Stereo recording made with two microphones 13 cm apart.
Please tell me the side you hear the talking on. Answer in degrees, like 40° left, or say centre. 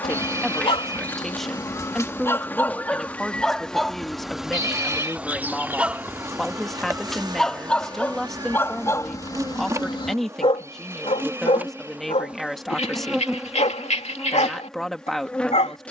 centre.